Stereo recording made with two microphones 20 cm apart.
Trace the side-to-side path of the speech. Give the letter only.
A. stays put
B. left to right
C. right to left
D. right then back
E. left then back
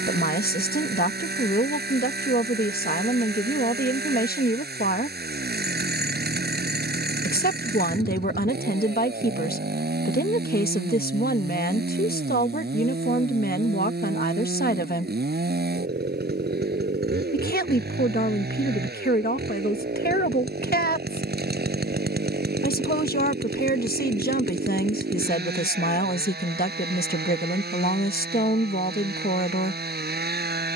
A.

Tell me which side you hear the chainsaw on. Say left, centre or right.
right.